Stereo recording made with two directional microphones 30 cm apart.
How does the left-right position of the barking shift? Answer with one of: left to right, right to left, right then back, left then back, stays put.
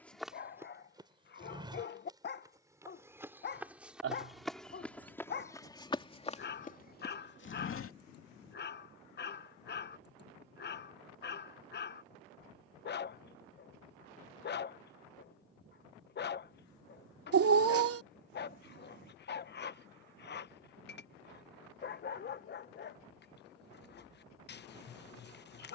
stays put.